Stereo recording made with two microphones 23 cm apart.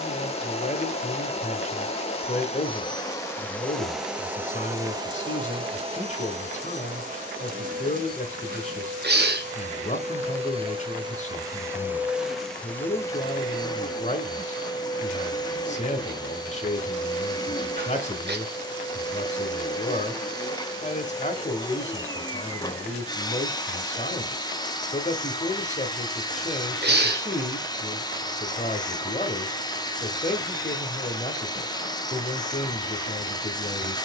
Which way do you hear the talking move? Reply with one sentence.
In this clip you hear the talking stay put.